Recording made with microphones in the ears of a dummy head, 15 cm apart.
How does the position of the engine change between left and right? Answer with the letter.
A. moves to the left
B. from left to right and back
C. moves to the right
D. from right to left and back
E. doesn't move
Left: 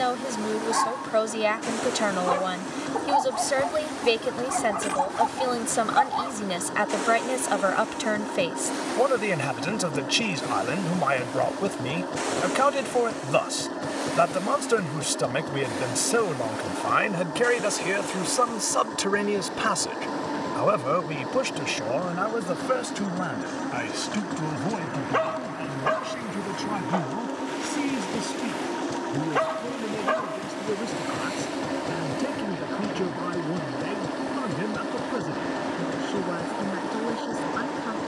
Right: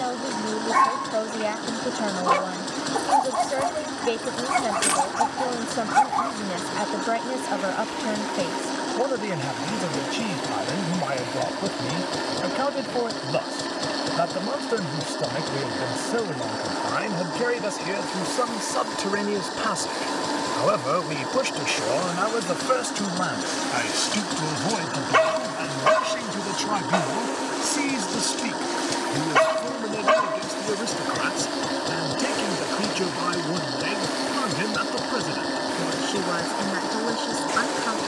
E.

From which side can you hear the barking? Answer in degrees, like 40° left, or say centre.
70° right.